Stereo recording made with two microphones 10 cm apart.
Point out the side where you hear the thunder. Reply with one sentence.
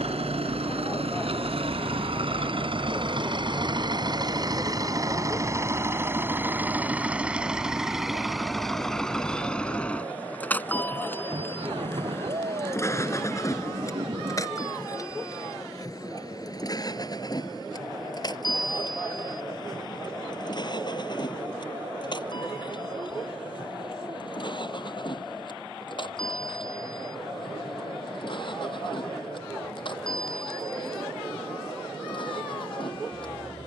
In this clip you hear the thunder on the right.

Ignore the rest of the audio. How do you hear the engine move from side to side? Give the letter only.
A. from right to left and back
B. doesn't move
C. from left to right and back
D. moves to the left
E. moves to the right
D.